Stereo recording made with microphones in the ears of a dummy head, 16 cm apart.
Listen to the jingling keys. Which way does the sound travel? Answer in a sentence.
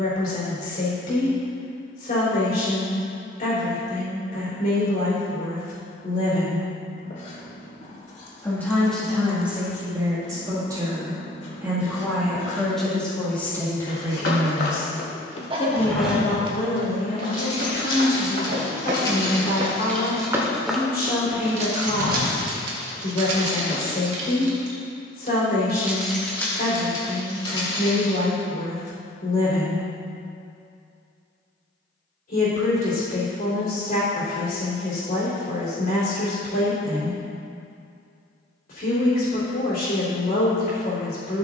You can hear the jingling keys move from left to right and back again.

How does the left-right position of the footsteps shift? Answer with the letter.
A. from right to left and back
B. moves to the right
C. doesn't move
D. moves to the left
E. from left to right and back
E.